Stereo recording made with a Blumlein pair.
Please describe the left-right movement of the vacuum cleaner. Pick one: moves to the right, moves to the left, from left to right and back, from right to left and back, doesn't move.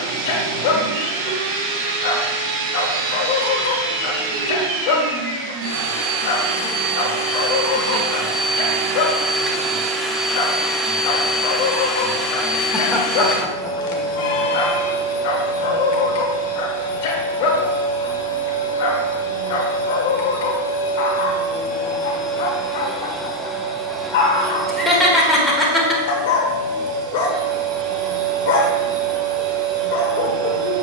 from right to left and back.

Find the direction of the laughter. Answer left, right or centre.
centre.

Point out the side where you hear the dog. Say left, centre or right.
left.